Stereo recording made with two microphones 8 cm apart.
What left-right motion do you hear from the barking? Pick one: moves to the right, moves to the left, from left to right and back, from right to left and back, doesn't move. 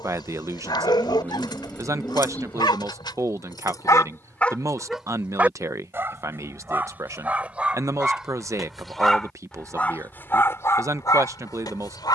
from left to right and back.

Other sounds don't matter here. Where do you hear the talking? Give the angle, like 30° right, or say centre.
40° right.